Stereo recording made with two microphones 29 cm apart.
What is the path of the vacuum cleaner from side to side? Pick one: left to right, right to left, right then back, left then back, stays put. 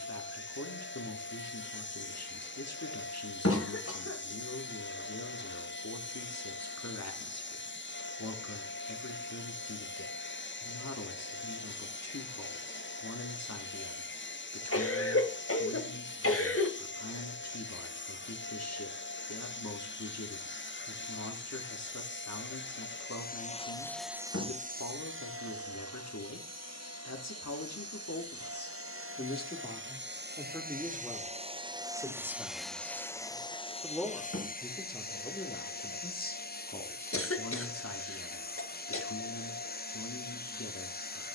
right then back.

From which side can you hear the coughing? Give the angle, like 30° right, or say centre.
50° left.